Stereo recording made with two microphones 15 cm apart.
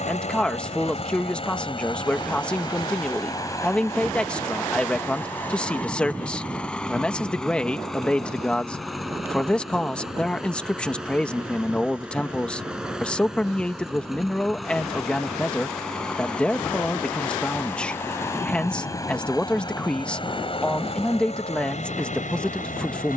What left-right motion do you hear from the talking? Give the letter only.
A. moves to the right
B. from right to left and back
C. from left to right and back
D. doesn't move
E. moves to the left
D.